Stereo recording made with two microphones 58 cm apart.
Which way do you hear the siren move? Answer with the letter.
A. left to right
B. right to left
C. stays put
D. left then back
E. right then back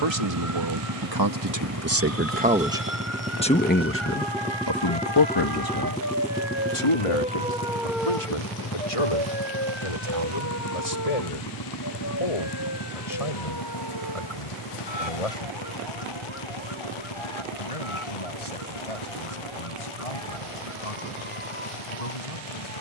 B.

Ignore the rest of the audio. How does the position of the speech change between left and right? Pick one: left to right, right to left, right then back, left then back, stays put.
right to left.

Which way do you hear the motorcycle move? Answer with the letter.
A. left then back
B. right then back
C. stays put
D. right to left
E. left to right
D.